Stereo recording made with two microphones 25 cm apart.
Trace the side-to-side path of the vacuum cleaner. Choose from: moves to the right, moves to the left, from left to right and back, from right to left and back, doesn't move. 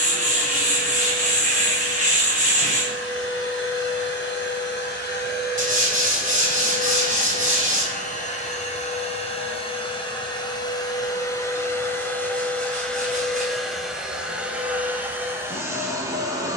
moves to the right.